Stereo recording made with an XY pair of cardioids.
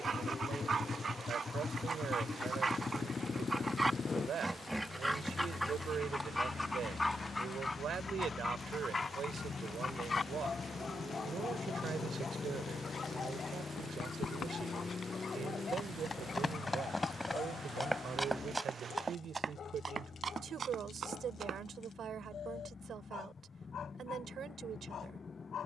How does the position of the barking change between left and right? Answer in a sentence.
You can hear the barking move to the left.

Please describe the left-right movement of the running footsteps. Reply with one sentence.
In this clip you hear the running footsteps go from the left side to the right.